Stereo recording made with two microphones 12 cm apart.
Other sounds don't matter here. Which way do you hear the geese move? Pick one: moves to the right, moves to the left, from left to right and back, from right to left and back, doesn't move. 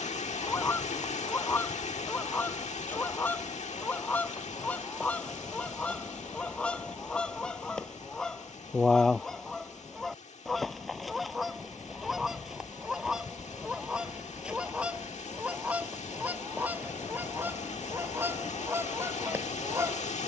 moves to the right.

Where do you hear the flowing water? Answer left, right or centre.
left.